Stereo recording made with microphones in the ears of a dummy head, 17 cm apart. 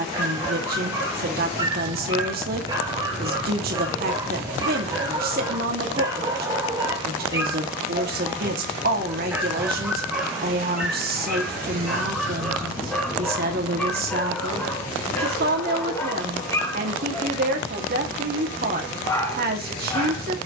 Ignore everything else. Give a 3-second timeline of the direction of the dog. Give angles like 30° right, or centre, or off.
20° right, 20° right, 20° right, centre, 10° left, 20° left, 20° left.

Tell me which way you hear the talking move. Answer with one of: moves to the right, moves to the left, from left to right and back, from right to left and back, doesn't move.
doesn't move.